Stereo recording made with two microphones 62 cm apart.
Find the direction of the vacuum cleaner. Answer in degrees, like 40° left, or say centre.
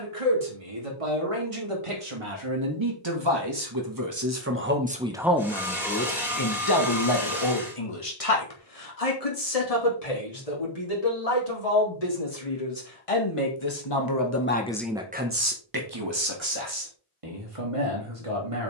centre.